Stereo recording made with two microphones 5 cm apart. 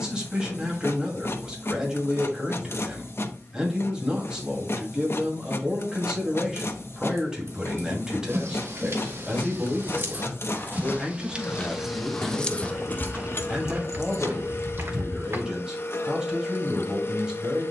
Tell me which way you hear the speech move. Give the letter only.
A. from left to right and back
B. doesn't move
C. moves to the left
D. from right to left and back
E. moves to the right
B.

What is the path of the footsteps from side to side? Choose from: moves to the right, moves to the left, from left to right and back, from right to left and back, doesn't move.
moves to the right.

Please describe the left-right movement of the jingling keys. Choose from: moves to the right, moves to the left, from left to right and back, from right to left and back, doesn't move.
moves to the left.